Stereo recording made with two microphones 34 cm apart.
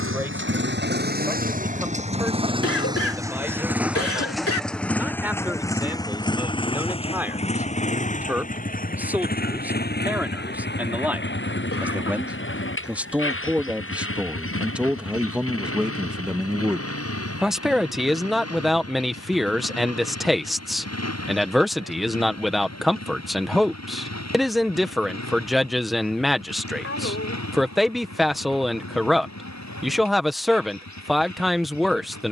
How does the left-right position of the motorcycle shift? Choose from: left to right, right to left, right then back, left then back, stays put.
right to left.